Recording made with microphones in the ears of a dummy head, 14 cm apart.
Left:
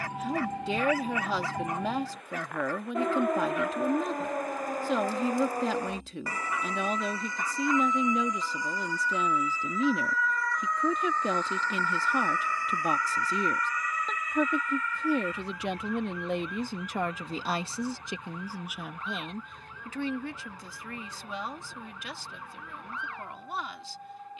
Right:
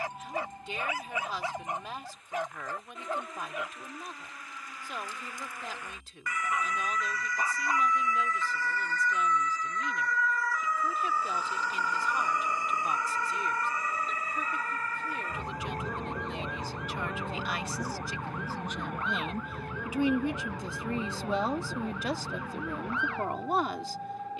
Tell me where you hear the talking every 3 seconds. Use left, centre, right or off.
left, left, left, left, left, left, centre, right.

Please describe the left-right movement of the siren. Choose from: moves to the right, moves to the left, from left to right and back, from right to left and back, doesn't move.
moves to the right.